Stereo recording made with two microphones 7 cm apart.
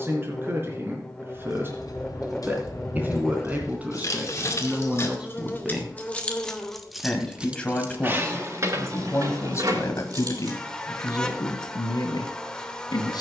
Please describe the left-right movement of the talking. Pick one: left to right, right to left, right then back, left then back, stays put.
right to left.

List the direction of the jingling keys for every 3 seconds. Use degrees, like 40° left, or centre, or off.
60° left, 40° left, 20° right, 60° right, off.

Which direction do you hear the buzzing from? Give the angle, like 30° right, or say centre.
10° left.